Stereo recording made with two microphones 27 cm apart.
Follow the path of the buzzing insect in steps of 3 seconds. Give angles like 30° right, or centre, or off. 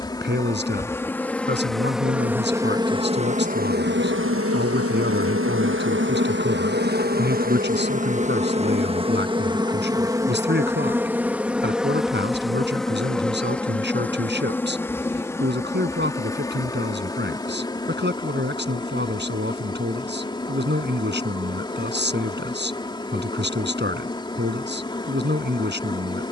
centre, 40° right, 30° right, 10° right, centre, 10° left, 20° left, 20° left, 20° left.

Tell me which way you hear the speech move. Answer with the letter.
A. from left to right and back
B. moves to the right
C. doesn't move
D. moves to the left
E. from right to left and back
C.